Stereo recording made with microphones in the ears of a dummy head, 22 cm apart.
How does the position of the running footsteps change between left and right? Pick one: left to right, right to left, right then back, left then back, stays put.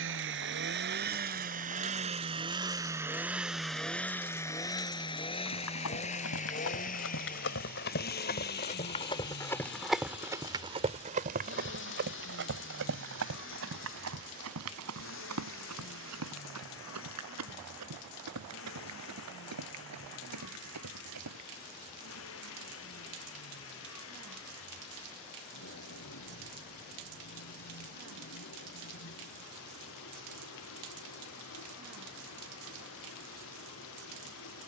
left to right.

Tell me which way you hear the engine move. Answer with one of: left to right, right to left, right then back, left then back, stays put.
right to left.